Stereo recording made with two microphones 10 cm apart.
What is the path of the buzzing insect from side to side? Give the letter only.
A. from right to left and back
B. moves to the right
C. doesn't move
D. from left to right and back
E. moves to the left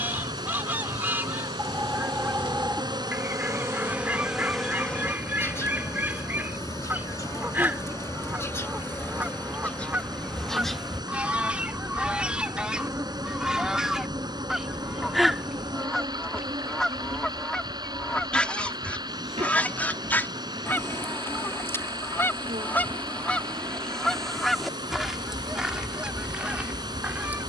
A.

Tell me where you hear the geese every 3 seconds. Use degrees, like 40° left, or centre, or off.
20° right, 20° right, 20° right, 10° right, 10° right, centre, 10° left, 20° left, centre.